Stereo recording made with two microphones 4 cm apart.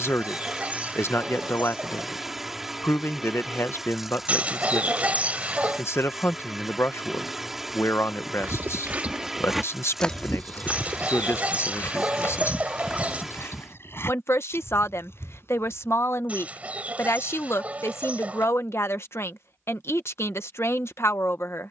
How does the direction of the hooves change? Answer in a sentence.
In this clip you hear the hooves go from the right side to the left.